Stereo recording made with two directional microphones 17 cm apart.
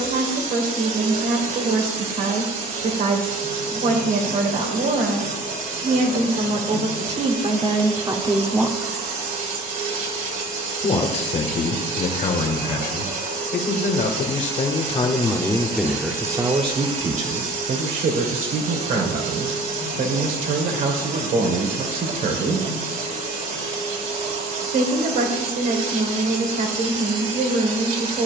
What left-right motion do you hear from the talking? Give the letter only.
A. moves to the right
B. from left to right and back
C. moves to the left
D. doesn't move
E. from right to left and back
E.